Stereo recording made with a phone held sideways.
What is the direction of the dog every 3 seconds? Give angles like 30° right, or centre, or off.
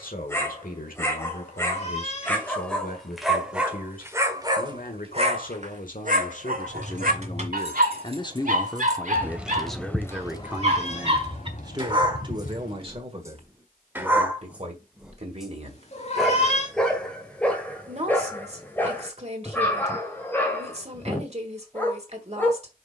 10° left, 20° right, 70° right, 50° right, 20° right, centre, 10° left, 10° left.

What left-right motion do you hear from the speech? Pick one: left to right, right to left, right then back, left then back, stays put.
left to right.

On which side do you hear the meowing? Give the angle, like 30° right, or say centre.
40° left.